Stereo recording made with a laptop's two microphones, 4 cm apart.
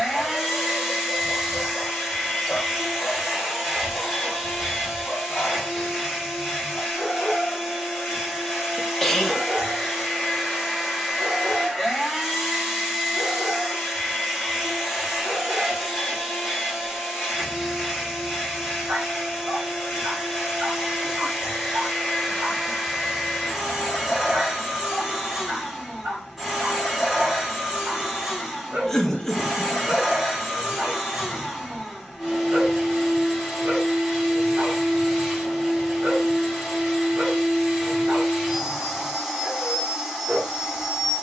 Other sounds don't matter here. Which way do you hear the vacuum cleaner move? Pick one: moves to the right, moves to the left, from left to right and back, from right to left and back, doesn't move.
doesn't move.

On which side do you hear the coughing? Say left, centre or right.
centre.